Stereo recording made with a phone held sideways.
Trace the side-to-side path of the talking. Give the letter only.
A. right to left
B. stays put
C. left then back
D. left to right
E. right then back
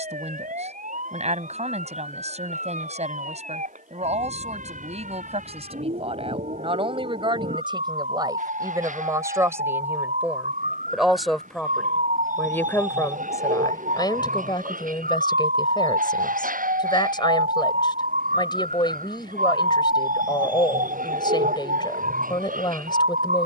A.